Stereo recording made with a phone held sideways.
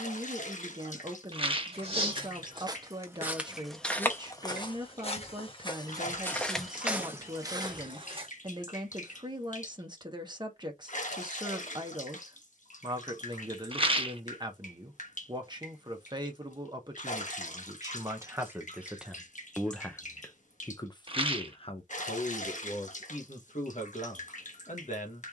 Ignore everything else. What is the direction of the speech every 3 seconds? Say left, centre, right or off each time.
right, right, right, right, right, right, centre, left, left.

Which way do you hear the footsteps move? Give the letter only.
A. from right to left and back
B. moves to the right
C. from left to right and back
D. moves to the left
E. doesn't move
A.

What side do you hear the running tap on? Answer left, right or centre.
left.